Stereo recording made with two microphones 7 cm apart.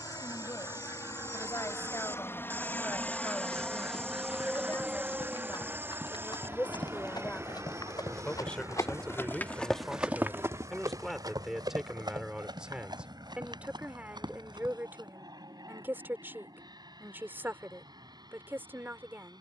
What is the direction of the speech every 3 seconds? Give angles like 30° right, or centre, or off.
40° left, 30° left, 20° left, centre, 20° right, 30° right, 30° right.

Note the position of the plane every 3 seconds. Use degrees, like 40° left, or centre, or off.
40° left, 10° right, 40° right, 50° right, 50° right, 60° right, 60° right.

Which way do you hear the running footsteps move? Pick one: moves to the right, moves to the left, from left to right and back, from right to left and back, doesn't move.
moves to the right.